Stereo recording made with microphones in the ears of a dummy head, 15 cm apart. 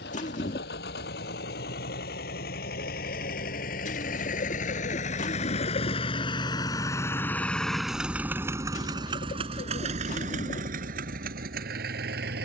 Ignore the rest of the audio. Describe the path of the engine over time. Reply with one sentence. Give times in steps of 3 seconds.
In this clip you hear the engine on the left from 0 s, in the centre from 6 s and on the right from 9 s.